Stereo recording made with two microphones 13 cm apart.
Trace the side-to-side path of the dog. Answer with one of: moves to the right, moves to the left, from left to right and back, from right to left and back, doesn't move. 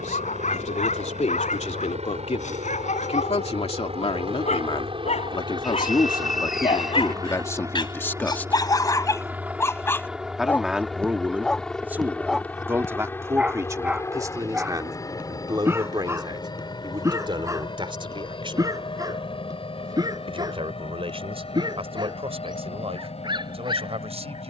moves to the right.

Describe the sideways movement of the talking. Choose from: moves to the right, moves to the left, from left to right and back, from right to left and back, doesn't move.
moves to the right.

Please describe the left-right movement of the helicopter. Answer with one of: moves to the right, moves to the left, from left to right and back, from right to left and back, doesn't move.
moves to the left.